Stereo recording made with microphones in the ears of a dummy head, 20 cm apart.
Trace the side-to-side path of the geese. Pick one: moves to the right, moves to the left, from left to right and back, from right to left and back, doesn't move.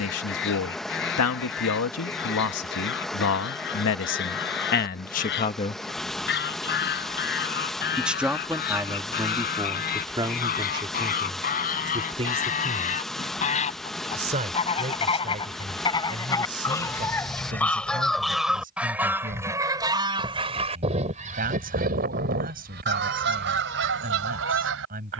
moves to the right.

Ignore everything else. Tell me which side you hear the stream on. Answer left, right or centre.
centre.